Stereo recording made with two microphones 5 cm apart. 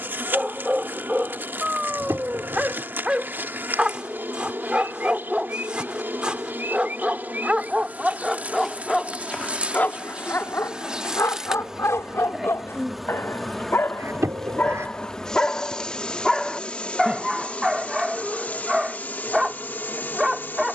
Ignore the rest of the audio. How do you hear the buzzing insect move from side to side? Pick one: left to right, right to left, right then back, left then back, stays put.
right to left.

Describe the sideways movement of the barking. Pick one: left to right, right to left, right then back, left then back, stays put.
left then back.